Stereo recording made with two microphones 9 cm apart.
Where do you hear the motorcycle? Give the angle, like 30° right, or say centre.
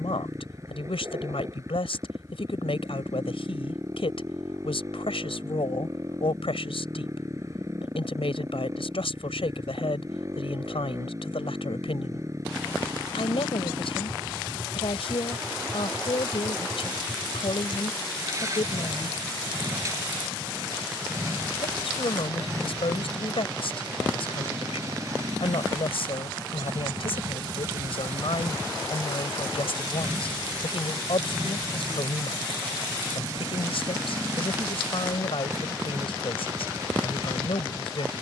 30° right.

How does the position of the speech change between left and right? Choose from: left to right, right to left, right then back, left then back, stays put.
stays put.